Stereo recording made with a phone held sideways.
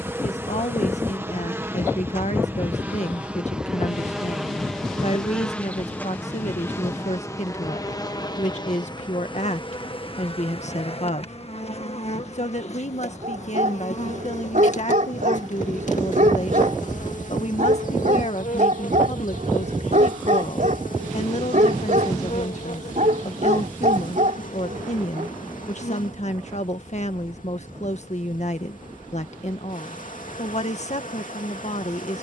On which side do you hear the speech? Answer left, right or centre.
left.